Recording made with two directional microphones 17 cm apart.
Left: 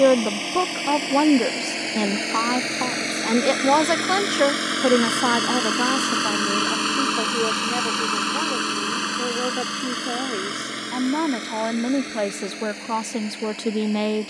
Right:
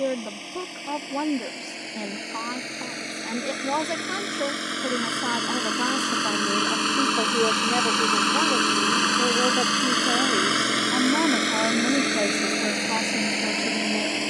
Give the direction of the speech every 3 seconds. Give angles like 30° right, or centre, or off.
60° left, 50° left, centre, centre, 30° left.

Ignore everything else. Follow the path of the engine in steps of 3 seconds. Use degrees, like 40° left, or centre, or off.
50° left, 30° left, centre, 30° right, 50° right.